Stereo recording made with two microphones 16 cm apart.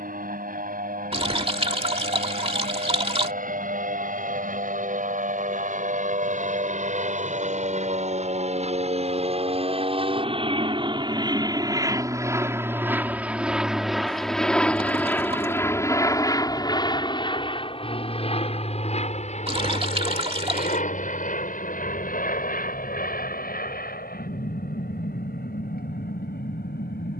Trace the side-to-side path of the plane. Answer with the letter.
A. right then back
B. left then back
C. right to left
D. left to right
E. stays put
C.